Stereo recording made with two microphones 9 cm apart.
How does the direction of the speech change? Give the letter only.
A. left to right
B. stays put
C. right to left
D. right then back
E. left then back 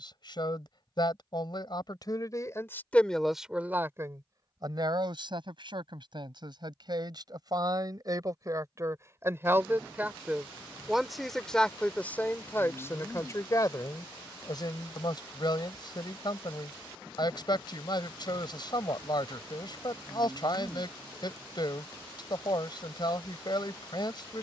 D.